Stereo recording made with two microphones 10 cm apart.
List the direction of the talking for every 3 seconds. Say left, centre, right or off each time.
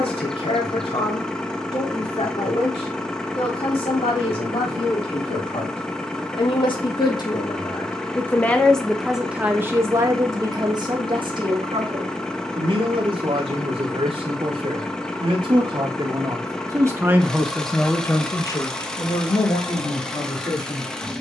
left, left, left, right, right, right, left.